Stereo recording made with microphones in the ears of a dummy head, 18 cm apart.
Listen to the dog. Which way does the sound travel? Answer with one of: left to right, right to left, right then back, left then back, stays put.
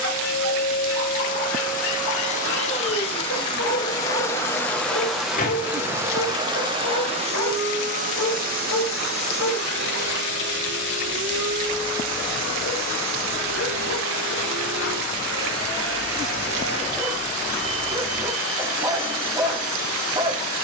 left to right.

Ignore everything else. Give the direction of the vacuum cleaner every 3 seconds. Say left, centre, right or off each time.
left, centre, right, right, right, right, right.